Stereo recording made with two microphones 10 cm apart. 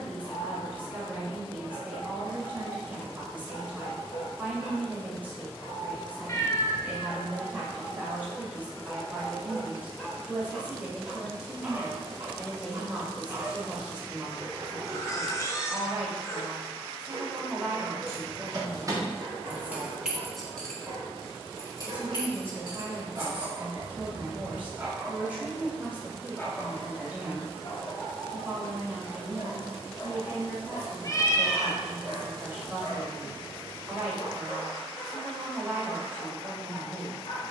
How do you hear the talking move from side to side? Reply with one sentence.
You can hear the talking stay put.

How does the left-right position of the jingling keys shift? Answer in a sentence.
In this clip you hear the jingling keys travel towards the left.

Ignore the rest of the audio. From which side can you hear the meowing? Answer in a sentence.
In this clip you hear the meowing on the left.